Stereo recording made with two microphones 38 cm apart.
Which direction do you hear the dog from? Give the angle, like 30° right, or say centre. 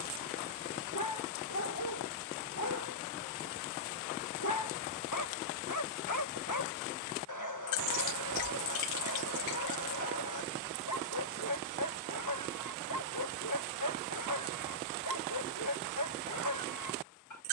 60° left.